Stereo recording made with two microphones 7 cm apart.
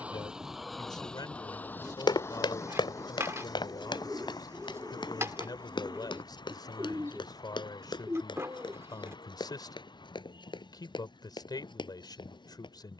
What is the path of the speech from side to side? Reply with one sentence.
In this clip you hear the speech stay put.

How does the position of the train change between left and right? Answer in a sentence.
You can hear the train move from right to left.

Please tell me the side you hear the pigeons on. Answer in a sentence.
In this clip you hear the pigeons on the right.